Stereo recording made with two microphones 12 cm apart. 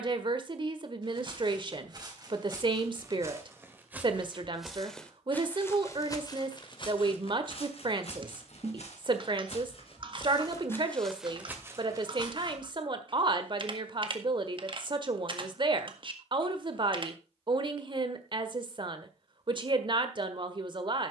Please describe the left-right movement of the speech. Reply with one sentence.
You can hear the speech stay put.